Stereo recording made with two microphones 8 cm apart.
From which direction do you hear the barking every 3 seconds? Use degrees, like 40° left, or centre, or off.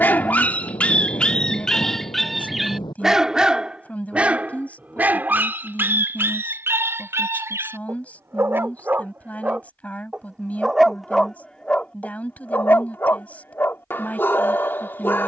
10° left, 20° right, 30° right, centre, 30° left.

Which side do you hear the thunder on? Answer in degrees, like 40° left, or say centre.
70° left.